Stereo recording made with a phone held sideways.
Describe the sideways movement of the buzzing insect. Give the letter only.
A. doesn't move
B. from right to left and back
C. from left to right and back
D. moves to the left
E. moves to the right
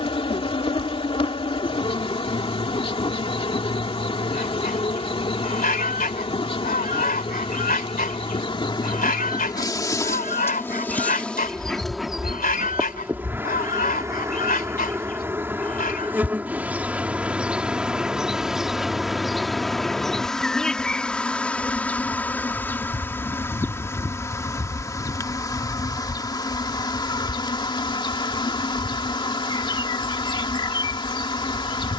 C.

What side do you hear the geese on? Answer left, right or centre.
left.